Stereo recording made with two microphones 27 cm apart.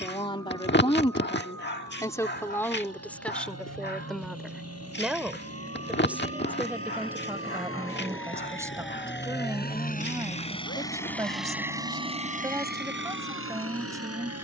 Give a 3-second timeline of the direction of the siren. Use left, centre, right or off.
right, right, right, left, left.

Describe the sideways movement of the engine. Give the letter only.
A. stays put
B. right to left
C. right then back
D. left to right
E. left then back
D.